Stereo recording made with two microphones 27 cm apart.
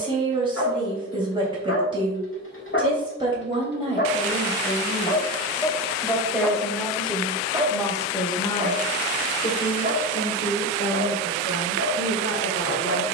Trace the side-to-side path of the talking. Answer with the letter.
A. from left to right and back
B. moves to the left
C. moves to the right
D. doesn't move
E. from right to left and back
B.